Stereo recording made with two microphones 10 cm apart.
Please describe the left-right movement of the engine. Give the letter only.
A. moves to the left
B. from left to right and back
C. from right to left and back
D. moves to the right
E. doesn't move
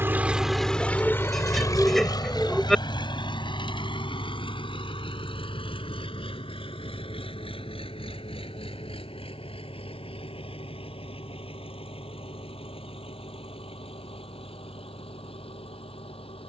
A.